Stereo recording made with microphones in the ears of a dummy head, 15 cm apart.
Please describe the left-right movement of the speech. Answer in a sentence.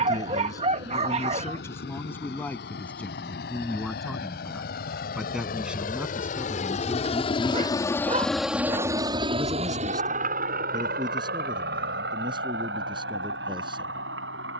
In this clip you hear the speech move to the right.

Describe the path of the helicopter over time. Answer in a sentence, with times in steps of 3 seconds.
In this clip you hear the helicopter on the left from 0 s and on the right from 9 s.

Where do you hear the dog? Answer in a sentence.
In this clip you hear the dog on the right.